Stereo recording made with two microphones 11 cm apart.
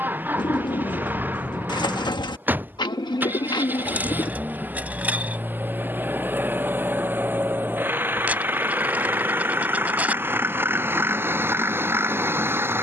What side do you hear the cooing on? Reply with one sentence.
In this clip you hear the cooing on the left.